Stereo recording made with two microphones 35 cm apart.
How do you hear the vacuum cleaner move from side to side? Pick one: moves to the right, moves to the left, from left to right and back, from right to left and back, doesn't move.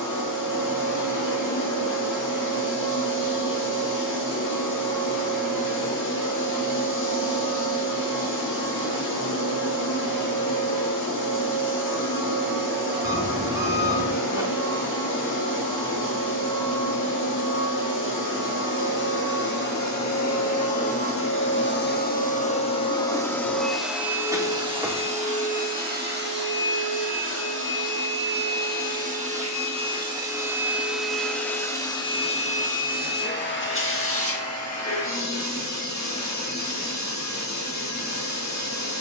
from left to right and back.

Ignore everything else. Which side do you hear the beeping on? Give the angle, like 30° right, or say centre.
10° right.